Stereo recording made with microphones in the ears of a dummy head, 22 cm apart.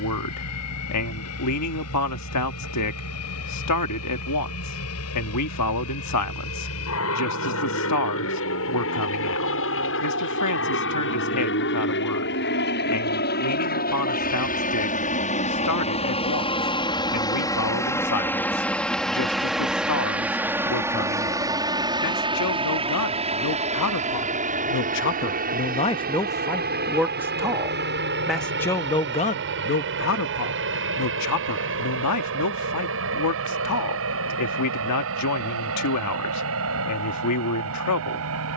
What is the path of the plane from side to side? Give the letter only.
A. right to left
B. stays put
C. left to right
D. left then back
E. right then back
C.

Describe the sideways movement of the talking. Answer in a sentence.
In this clip you hear the talking go right and come back.